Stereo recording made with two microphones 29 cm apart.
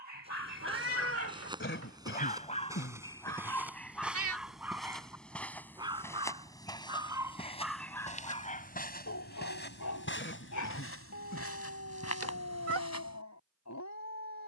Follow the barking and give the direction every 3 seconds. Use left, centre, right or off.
left, centre, centre, left, left.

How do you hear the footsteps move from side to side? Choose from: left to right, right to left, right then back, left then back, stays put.
right to left.